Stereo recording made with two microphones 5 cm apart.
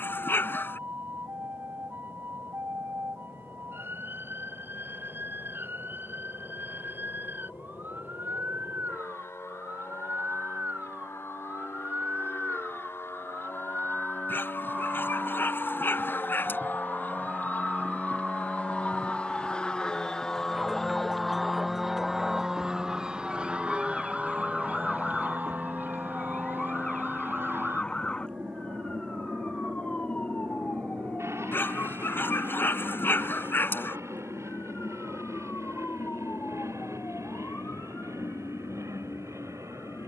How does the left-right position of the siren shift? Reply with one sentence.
In this clip you hear the siren move to the left.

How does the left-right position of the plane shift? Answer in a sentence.
In this clip you hear the plane travel towards the right.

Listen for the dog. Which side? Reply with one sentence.
You can hear the dog on the left.